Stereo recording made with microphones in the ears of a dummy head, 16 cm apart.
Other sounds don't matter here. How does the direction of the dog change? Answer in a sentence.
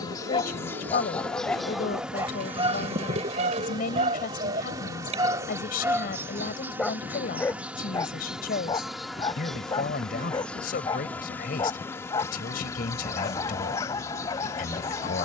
In this clip you hear the dog go right and come back.